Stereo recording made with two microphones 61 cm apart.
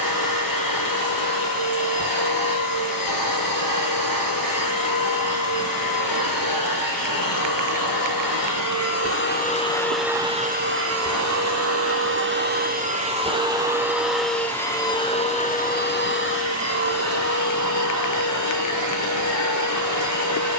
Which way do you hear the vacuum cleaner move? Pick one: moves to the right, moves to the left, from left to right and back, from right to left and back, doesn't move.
from left to right and back.